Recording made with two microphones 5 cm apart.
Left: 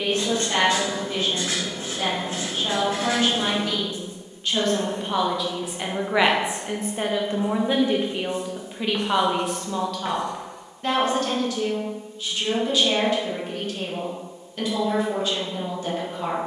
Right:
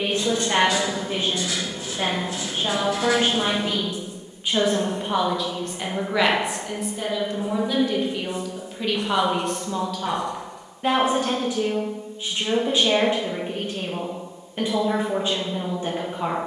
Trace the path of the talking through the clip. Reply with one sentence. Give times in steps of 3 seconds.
You can hear the talking on the right from 0 s, in the centre from 3 s, on the left from 6 s, in the centre from 9 s and on the right from 12 s.